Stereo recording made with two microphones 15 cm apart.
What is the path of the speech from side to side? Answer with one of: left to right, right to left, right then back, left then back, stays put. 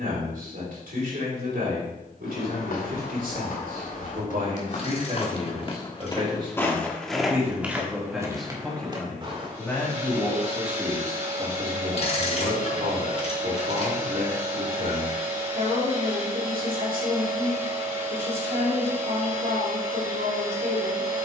left then back.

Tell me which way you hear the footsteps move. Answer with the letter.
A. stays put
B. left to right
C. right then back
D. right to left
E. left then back
B.